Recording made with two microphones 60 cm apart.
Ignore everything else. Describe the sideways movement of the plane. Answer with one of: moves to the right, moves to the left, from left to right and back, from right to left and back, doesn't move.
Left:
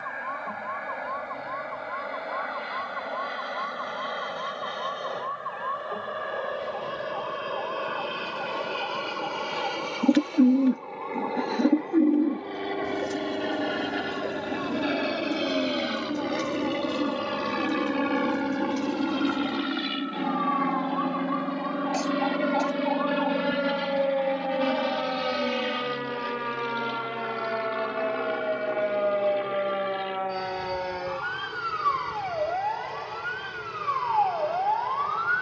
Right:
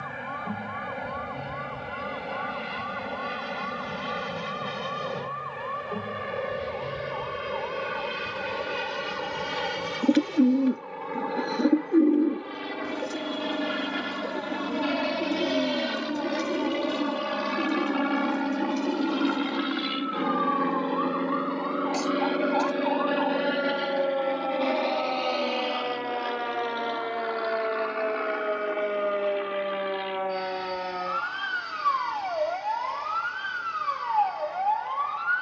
moves to the left.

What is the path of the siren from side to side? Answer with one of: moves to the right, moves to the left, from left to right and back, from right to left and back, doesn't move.
moves to the right.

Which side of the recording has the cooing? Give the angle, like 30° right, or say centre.
20° left.